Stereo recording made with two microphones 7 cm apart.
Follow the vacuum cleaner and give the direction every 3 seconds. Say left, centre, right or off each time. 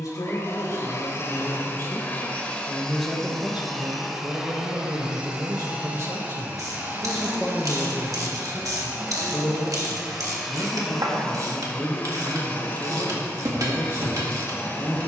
left, centre, right, centre, left.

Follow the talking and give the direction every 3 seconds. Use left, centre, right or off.
left, right, centre, left, left.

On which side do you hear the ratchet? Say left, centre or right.
right.